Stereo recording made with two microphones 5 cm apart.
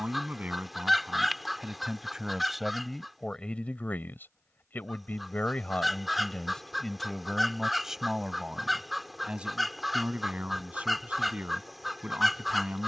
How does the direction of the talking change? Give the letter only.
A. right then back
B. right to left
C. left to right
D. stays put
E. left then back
E.